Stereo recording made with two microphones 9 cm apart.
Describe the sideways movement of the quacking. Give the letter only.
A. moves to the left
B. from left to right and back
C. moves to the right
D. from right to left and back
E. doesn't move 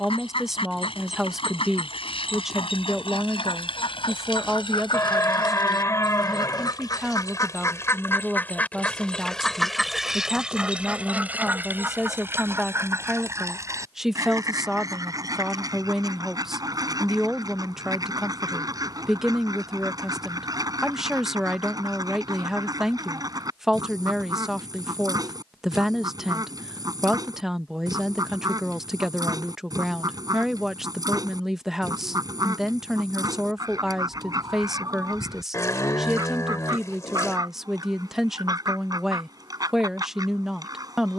C.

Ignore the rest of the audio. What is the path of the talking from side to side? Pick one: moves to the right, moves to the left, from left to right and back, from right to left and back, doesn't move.
doesn't move.